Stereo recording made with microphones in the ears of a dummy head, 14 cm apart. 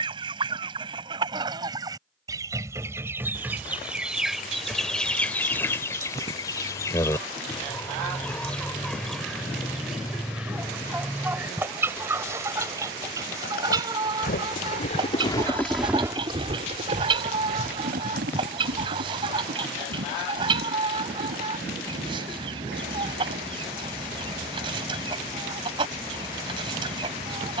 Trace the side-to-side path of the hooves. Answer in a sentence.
In this clip you hear the hooves move from left to right.